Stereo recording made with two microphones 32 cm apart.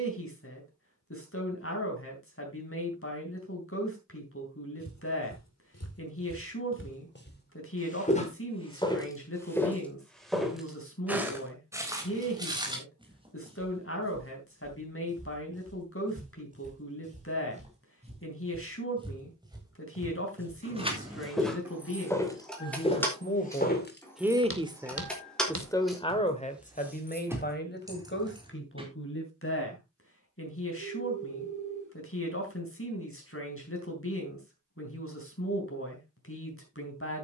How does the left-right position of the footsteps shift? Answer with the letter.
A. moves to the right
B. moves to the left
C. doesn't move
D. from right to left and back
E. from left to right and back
E.